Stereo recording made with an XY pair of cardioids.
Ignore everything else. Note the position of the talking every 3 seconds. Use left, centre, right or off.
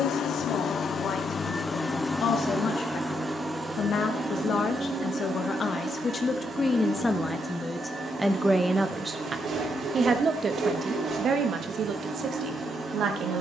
left, left, centre, right, right.